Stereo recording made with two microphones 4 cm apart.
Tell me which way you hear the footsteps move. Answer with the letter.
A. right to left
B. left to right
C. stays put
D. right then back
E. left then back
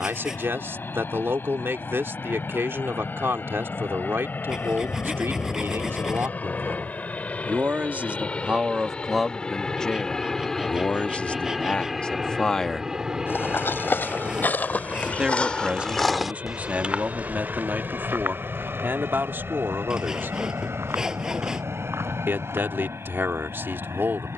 B.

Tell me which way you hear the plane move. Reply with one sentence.
In this clip you hear the plane travel towards the right.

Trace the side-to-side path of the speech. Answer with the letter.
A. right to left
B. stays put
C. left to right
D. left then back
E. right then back
D.